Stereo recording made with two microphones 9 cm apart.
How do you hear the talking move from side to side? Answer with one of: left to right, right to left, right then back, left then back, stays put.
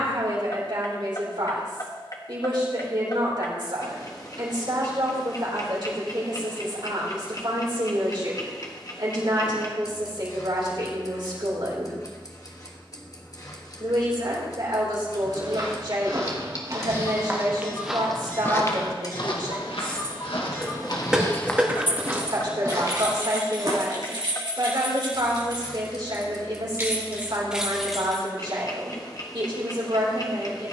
stays put.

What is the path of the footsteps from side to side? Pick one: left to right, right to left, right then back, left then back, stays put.
left then back.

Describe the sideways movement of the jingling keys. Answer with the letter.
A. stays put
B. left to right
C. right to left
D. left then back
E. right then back
E.